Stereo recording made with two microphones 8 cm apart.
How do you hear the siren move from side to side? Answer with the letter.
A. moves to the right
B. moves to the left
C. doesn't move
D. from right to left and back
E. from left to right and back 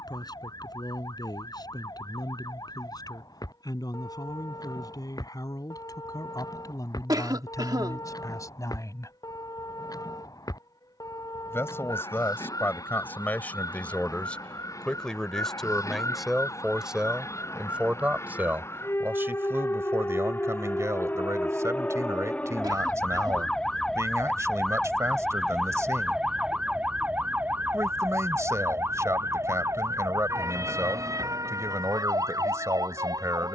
A.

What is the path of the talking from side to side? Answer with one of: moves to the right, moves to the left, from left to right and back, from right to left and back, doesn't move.
moves to the right.